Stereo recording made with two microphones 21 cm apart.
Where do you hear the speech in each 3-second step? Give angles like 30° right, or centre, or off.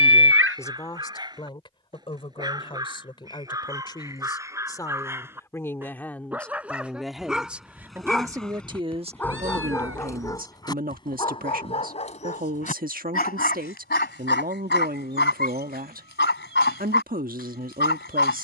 20° left, 20° left, 10° right, 40° right, 40° right, 40° right.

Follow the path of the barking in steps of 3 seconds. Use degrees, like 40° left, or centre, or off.
20° right, 10° right, centre, 20° left, 50° left, 60° left.